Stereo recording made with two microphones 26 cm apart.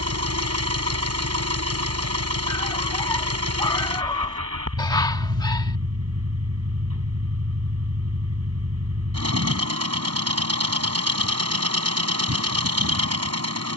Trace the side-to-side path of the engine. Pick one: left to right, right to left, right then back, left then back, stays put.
stays put.